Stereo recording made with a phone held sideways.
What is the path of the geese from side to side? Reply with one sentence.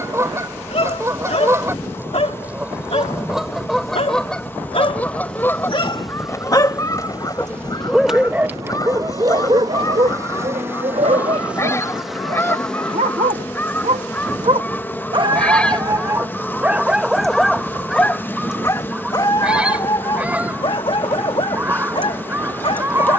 You can hear the geese move from right to left and back again.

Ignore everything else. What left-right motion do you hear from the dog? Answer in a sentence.
In this clip you hear the dog go right and come back.